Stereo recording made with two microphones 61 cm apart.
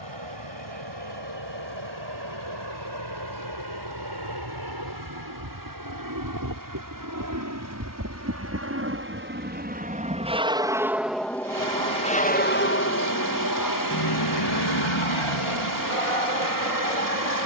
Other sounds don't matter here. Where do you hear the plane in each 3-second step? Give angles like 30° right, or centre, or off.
50° right, 40° right, 30° right, 10° right, 30° left, 60° left.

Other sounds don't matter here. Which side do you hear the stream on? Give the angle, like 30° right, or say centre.
30° right.